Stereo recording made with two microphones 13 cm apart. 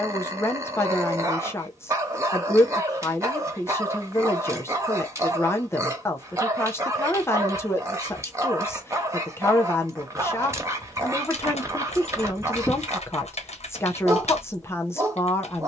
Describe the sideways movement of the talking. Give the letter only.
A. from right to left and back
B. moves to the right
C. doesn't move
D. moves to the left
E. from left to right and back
C.